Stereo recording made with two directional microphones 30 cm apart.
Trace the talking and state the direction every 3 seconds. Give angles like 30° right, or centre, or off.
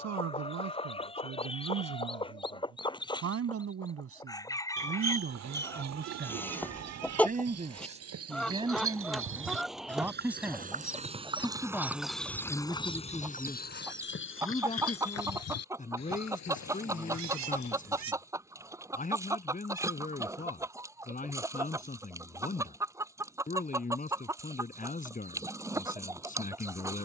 60° right, 40° right, 20° right, centre, 10° left, 30° left, 30° left, 30° left, 30° left.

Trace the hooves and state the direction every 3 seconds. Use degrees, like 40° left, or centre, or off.
off, 60° right, 60° right, 30° right, 30° left, 60° left, off, off, off.